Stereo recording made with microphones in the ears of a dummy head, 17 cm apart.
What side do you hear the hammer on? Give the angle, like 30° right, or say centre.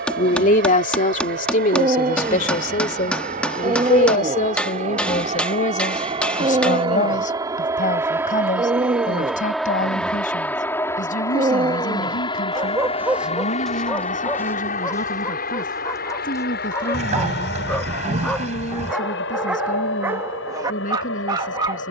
10° left.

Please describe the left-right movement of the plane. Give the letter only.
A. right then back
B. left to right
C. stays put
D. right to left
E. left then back
D.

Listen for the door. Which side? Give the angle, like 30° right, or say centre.
40° right.